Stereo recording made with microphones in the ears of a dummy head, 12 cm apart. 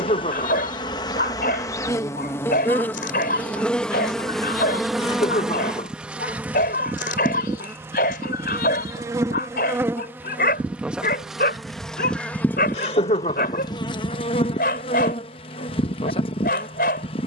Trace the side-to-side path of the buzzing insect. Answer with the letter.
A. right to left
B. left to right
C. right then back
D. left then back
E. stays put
C.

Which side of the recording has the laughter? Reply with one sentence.
You can hear the laughter on the left.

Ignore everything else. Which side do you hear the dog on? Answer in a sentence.
You can hear the dog on the left.